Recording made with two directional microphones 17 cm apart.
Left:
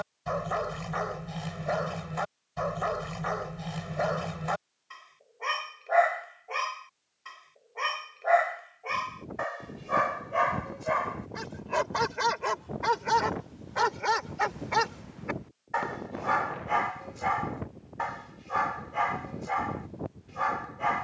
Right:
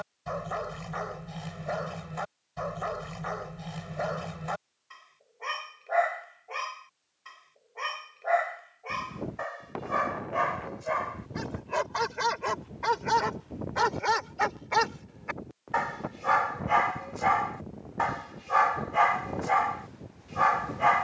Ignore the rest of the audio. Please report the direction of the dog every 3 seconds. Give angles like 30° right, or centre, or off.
20° left, 20° left, 20° left, 10° left, centre, 20° right, 30° right.